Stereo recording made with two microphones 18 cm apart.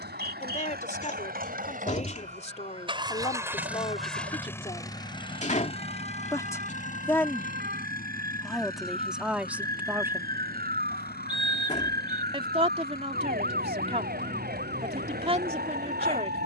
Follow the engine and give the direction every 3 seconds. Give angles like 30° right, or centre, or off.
50° right, 10° left, 50° left, 60° left, 70° left, 70° left.